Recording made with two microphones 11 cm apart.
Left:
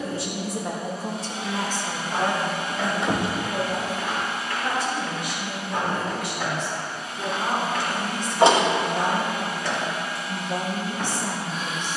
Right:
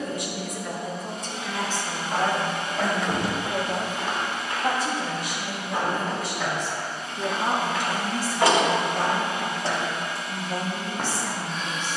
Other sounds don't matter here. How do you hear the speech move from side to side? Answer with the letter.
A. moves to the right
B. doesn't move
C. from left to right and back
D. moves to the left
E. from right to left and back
C.